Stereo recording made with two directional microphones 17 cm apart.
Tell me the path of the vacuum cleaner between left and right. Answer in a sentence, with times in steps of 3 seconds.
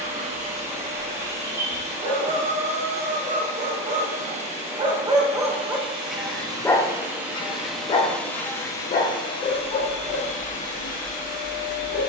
You can hear the vacuum cleaner on the right from 0 s, in the centre from 6 s and on the left from 9 s.